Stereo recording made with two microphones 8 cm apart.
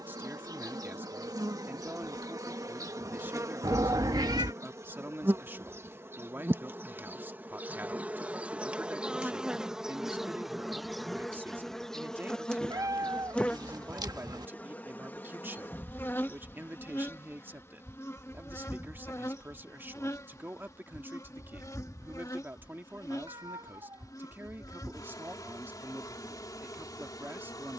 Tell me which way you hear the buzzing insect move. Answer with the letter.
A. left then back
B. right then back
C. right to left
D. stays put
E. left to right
C.